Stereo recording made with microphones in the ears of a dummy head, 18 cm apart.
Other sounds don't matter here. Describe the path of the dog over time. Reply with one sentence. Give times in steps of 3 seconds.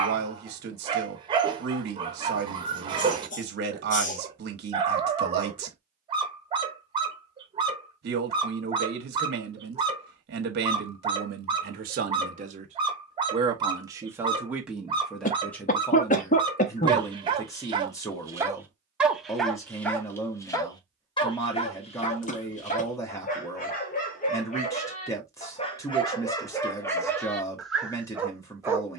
In this clip you hear the dog on the right from 0 s, in the centre from 18 s, on the left from 21 s and in the centre from 27 s.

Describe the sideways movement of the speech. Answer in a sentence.
In this clip you hear the speech travel towards the left.